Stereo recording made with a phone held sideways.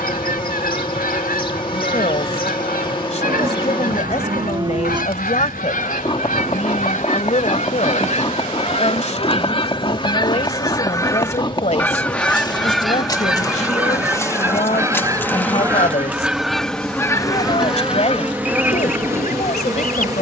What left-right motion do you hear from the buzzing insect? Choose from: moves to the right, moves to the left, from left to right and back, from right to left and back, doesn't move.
moves to the right.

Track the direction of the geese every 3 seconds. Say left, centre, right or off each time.
left, left, left, left, centre, centre, left.